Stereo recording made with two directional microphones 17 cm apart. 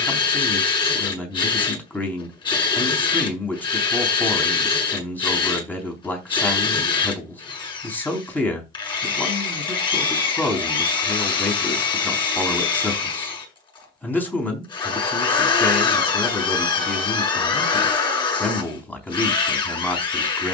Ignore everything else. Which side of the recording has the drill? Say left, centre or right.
left.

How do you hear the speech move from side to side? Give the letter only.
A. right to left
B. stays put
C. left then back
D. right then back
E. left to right
B.